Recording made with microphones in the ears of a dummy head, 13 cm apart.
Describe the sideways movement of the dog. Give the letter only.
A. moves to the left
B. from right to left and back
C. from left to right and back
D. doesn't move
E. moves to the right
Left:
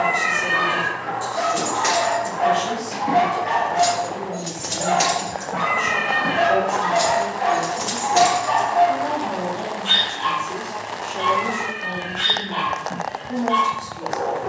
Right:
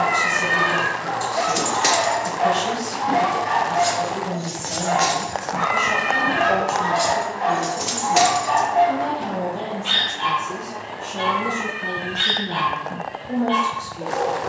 B.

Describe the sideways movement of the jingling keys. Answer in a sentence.
You can hear the jingling keys go left and come back.